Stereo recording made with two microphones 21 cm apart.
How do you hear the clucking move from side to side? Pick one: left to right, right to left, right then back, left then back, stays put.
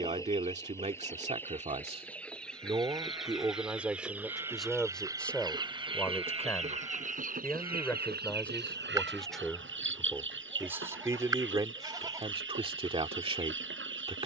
left to right.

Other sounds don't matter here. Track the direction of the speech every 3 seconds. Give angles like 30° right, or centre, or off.
30° right, centre, 10° left, 10° right, 30° right.